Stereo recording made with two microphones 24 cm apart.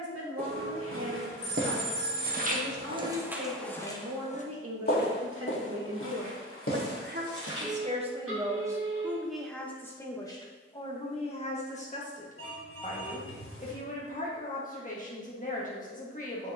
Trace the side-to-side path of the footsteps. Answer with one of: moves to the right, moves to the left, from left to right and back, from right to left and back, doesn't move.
moves to the left.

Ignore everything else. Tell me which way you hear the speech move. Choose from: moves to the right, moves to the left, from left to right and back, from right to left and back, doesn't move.
moves to the left.